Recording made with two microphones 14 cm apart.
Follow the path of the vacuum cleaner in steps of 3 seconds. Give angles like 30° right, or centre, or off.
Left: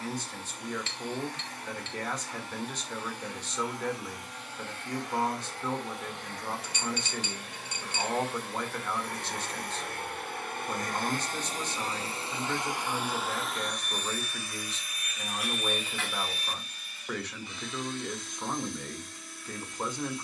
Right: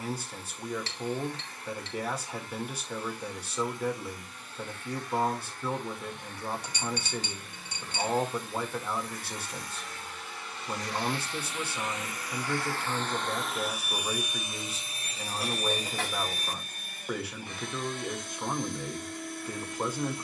80° left, 80° left, 70° left, 50° left, centre, 40° right, 60° right.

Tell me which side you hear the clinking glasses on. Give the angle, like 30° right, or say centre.
40° right.